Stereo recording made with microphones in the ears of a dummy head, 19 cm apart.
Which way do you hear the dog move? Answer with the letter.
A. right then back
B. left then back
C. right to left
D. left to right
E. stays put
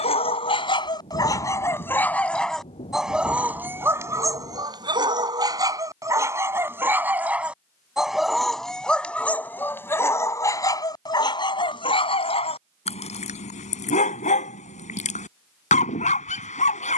A.